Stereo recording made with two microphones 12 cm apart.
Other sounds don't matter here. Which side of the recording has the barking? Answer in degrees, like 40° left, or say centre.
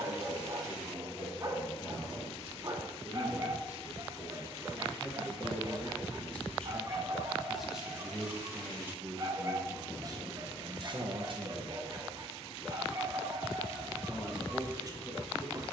30° right.